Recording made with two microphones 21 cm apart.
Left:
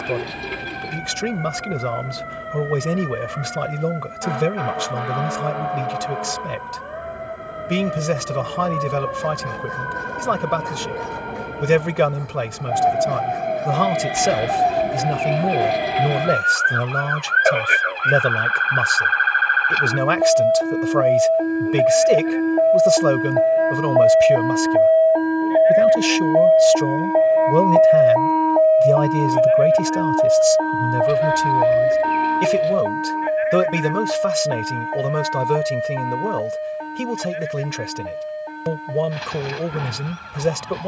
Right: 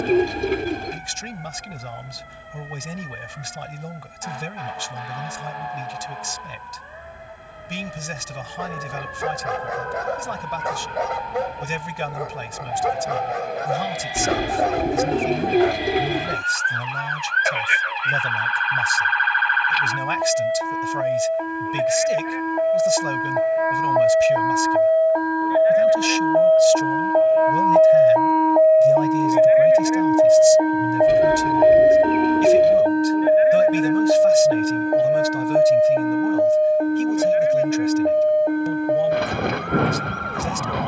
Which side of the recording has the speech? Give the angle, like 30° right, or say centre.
80° left.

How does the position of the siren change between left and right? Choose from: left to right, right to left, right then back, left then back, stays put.
left to right.